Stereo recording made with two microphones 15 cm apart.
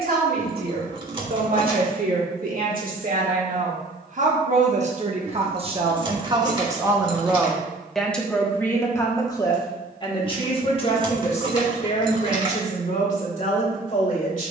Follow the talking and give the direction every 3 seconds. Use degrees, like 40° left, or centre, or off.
70° right, 50° right, 10° right, 40° left, 50° left.